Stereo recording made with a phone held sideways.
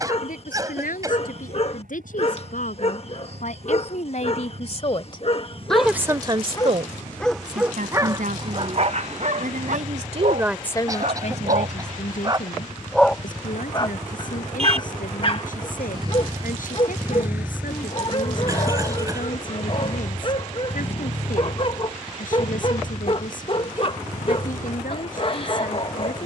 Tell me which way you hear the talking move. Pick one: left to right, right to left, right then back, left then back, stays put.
right then back.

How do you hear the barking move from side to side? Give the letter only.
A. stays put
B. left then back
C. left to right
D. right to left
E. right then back
E.